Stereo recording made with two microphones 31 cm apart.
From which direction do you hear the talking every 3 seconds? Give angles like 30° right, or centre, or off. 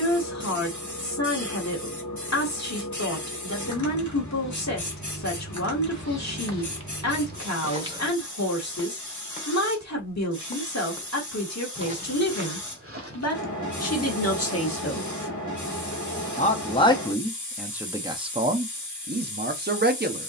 60° left, 60° left, 60° left, 60° left, 50° left, 10° left, 30° right.